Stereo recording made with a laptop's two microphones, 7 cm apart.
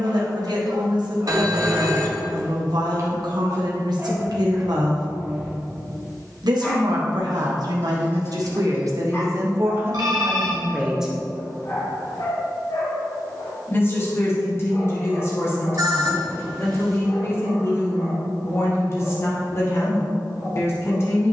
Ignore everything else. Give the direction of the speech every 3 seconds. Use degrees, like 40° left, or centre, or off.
70° right, 70° right, 70° right, 30° right, 30° left, 40° left, 40° left.